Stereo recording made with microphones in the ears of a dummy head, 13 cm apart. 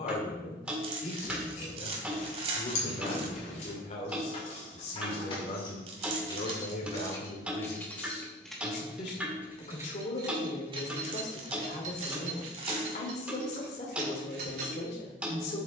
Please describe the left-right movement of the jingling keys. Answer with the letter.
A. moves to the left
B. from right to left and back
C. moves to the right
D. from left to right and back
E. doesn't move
C.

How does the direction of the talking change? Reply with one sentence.
In this clip you hear the talking stay in one place.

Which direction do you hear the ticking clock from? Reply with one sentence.
In this clip you hear the ticking clock in the centre.